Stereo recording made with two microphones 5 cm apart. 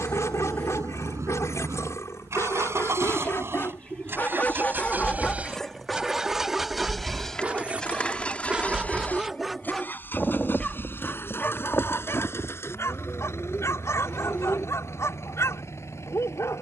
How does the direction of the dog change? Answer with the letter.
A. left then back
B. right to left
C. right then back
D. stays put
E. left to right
C.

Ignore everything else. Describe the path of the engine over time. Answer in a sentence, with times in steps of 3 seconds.
In this clip you hear the engine on the right from 0 s, in the centre from 6 s and on the left from 9 s.